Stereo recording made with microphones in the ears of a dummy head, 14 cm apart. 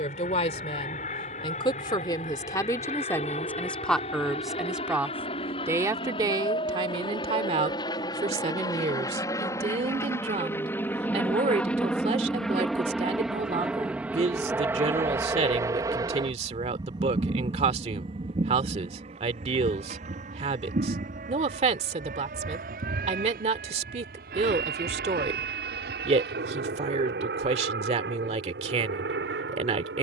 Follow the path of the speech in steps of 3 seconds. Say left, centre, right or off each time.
left, centre, right, right, right, right, right, right, right, right.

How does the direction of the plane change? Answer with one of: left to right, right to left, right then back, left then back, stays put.
left to right.